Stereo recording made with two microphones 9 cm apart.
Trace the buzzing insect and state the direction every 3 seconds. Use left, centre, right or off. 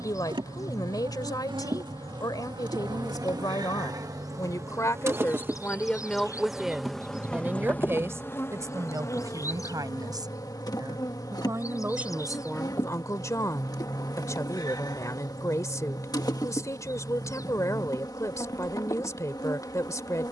right, right, centre, left, left, left, left.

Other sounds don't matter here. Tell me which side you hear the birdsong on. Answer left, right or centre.
left.